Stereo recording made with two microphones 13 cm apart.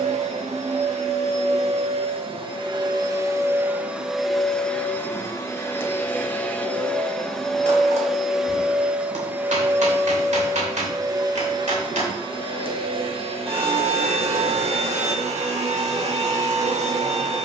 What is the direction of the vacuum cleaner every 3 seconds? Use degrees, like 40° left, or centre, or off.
50° right, centre, centre, 30° right, 50° right, 60° right.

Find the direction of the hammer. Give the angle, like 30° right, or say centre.
70° right.